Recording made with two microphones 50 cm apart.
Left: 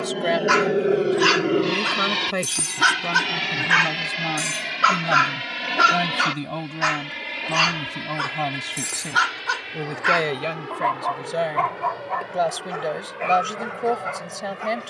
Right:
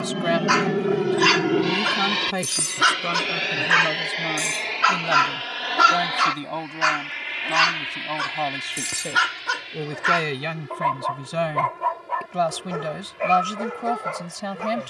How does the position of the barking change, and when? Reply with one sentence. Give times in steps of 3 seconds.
In this clip you hear the barking on the left from 0 s, in the centre from 3 s and on the right from 6 s.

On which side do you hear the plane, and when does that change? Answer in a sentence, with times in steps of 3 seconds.
You can hear the plane in the centre from 0 s and on the left from 3 s.